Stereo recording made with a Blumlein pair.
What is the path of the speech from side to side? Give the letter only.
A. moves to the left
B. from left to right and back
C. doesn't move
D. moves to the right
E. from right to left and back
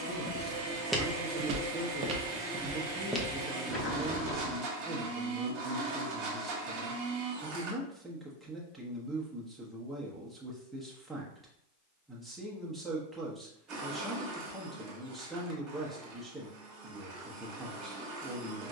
C.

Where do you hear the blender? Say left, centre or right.
right.